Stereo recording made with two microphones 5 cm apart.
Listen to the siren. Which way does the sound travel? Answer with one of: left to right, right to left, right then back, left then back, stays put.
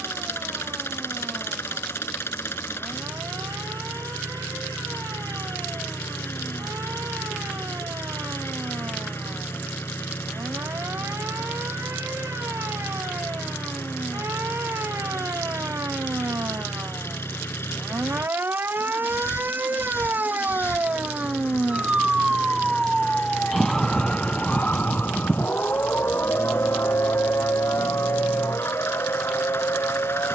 right to left.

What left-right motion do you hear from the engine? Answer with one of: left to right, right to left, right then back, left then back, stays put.
stays put.